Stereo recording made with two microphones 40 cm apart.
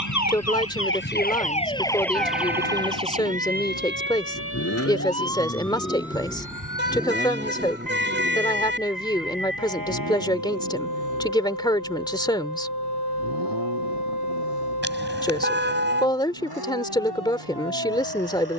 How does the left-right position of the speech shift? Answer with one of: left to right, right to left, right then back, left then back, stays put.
stays put.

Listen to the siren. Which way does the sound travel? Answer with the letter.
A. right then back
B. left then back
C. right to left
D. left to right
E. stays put
D.